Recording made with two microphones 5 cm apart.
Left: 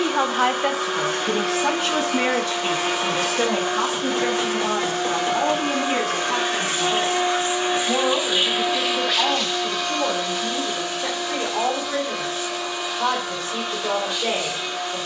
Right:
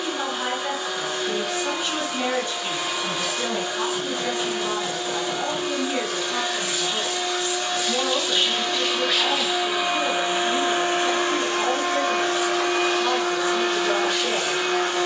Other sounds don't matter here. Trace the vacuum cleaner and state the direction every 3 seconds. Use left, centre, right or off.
left, left, left, right, right.